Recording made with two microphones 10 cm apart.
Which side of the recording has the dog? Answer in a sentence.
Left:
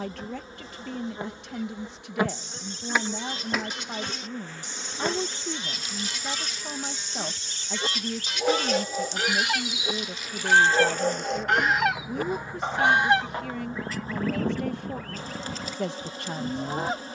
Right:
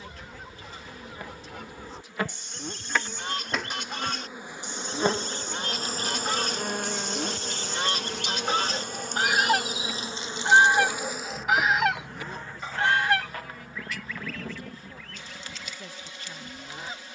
You can hear the dog on the left.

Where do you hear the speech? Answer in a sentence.
You can hear the speech on the left.